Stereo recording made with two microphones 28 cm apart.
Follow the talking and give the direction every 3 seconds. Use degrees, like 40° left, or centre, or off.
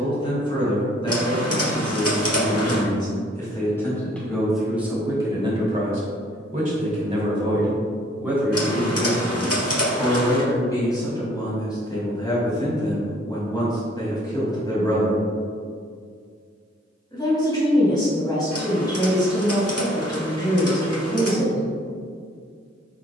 20° left, centre, 10° right, 10° left, 10° left, 10° left, 10° left, 10° left.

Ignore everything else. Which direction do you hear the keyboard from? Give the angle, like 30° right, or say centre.
60° left.